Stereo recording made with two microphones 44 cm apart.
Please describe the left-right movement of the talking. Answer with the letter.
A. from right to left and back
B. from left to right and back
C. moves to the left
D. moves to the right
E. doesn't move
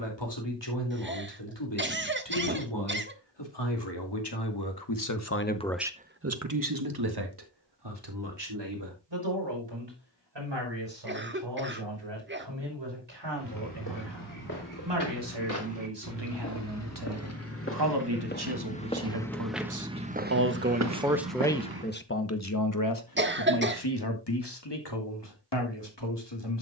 B.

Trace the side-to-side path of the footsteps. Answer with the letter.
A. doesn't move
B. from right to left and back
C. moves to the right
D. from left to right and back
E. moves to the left
C.